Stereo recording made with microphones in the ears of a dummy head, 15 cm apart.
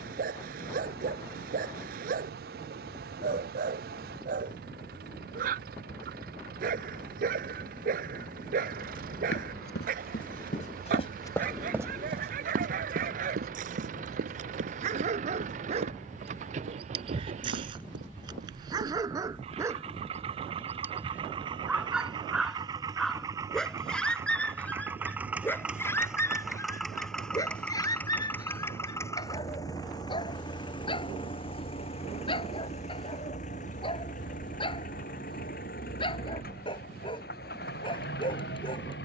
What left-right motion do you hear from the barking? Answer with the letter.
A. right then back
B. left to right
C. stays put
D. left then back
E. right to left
E.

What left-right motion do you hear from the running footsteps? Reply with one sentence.
You can hear the running footsteps move from left to right.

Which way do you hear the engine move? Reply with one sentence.
In this clip you hear the engine travel towards the left.